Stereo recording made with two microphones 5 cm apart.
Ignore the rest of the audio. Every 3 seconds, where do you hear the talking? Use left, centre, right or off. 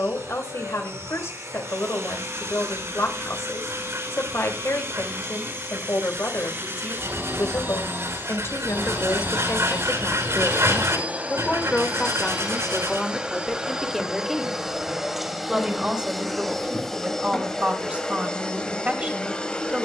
left, left, left, left, centre, right, right.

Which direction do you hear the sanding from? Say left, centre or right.
right.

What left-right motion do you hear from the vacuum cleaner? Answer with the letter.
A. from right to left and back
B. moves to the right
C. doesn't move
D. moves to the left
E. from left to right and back
D.